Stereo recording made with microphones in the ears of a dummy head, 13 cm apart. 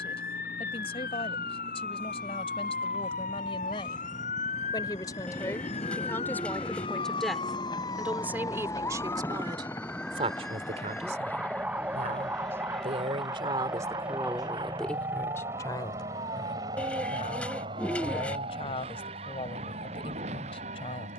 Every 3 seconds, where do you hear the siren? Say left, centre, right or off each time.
left, left, left, centre, right, right, right.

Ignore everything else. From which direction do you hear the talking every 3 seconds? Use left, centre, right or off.
left, left, centre, right, right, left, left.